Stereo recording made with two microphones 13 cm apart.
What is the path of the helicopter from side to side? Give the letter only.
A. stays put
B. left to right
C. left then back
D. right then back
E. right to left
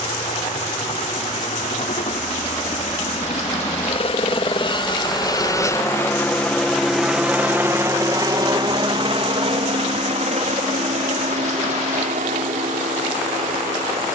B.